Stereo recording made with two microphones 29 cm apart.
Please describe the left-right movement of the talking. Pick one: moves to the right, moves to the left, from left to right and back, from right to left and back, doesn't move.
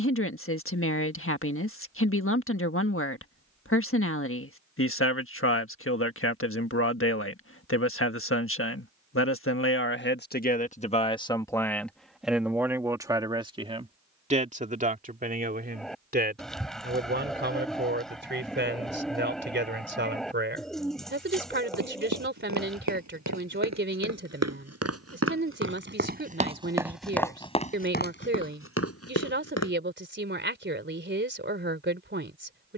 moves to the right.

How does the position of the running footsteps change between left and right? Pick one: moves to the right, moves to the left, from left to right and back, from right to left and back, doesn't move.
moves to the left.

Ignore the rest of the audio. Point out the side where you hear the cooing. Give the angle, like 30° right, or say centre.
centre.